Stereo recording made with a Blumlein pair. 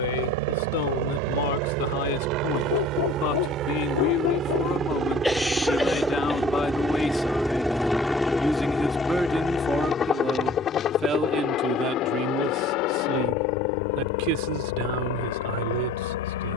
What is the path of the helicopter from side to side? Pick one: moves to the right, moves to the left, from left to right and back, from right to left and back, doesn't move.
moves to the left.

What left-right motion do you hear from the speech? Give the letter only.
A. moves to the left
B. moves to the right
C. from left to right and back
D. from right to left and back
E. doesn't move
B.